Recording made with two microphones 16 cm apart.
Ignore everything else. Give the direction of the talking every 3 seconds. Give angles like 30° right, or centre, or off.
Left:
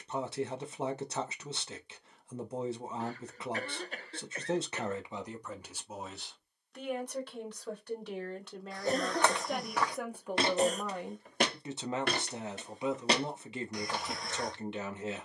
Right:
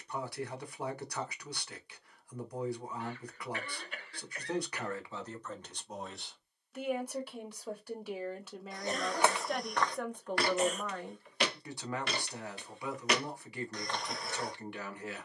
20° left, 20° left, 10° right, 10° left, 20° left.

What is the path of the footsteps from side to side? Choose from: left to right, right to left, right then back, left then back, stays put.
left then back.